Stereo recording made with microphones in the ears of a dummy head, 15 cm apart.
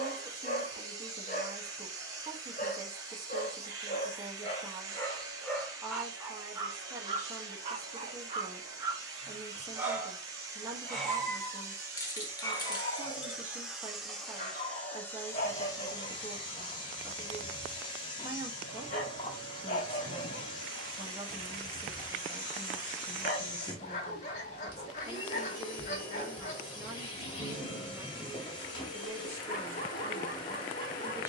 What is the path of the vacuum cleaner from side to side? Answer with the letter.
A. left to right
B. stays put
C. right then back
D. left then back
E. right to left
E.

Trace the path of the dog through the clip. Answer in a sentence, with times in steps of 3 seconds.
In this clip you hear the dog on the left from 0 s, on the right from 6 s, in the centre from 9 s and on the left from 12 s.